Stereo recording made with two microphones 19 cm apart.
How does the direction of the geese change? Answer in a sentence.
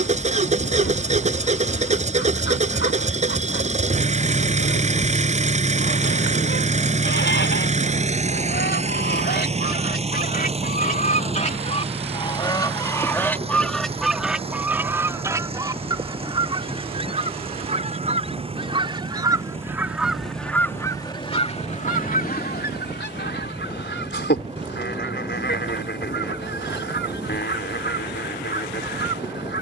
In this clip you hear the geese go right and come back.